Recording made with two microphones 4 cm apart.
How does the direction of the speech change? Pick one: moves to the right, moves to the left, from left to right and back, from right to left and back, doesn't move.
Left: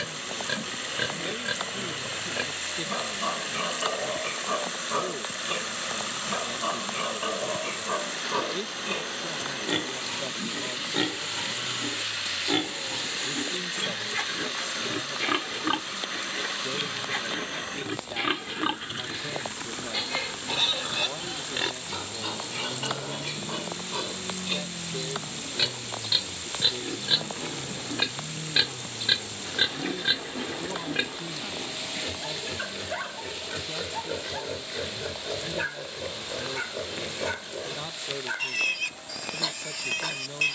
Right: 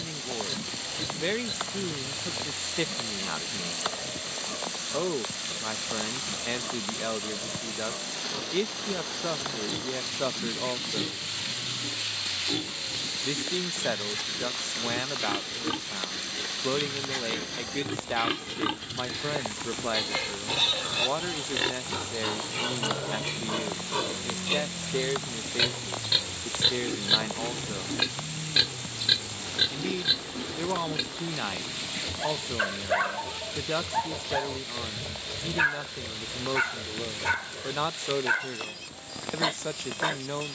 doesn't move.